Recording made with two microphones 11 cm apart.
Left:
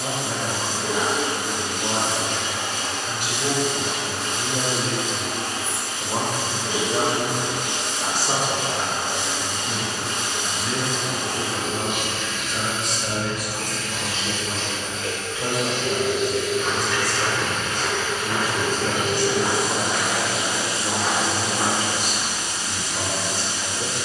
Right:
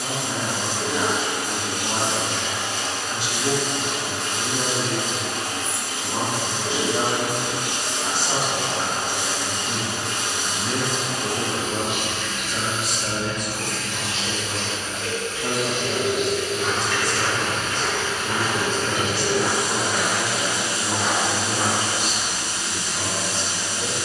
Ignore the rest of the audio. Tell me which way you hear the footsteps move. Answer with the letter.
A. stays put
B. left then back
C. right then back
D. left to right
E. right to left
B.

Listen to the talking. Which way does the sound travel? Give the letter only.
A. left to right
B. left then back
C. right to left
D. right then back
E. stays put
D.